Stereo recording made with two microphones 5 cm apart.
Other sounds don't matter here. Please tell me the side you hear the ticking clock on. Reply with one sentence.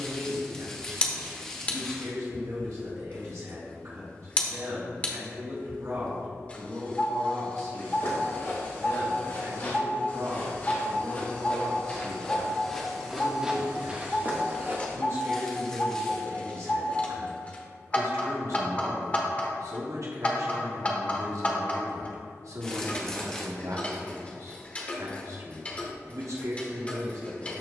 In this clip you hear the ticking clock on the left.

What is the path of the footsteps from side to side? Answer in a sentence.
You can hear the footsteps travel towards the right.